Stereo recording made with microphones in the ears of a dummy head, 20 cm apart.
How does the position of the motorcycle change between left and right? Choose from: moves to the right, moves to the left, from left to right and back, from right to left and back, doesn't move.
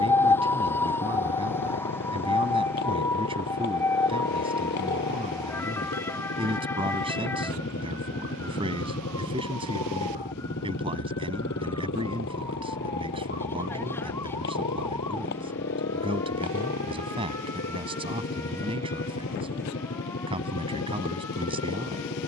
doesn't move.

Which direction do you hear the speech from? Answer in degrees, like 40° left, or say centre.
20° right.